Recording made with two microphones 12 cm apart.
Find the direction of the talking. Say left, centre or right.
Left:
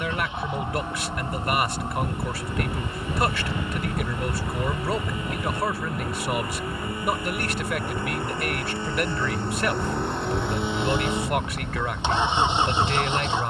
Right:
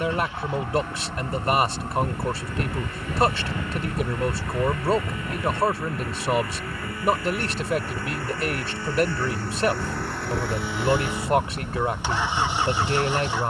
right.